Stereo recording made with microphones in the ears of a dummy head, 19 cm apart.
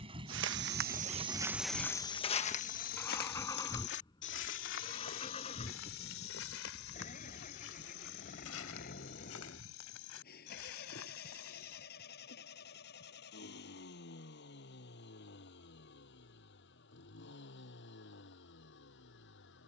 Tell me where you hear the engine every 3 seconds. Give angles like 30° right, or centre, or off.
10° right, 20° left, 40° left, 40° left, 50° left, 50° left, 50° left.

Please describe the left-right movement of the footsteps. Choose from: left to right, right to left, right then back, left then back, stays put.
right to left.